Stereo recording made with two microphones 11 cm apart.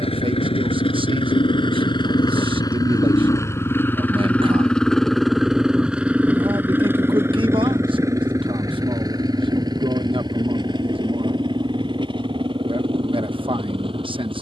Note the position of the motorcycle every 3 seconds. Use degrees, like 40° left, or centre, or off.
50° left, 10° left, 20° right, 40° right, 50° right.